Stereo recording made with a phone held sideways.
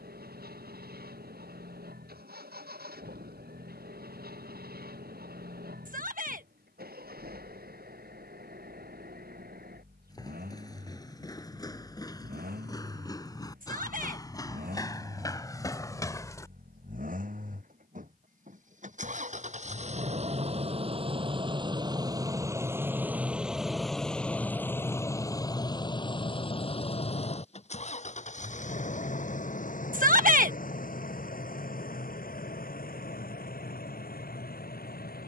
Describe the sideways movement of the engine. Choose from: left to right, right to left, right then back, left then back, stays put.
right to left.